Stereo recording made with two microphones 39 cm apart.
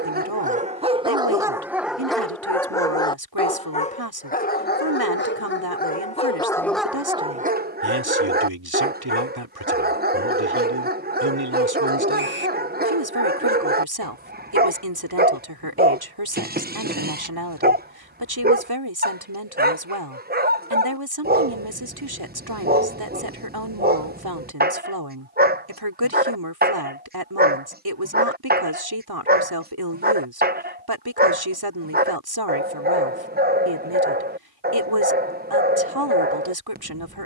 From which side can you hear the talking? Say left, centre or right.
right.